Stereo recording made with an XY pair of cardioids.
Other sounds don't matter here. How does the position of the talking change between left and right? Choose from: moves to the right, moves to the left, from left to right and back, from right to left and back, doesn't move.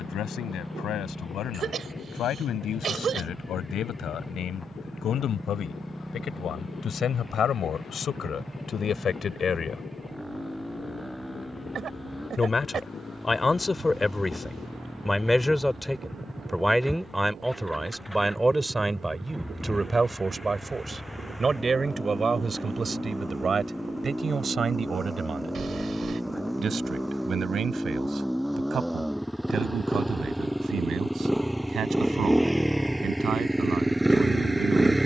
moves to the right.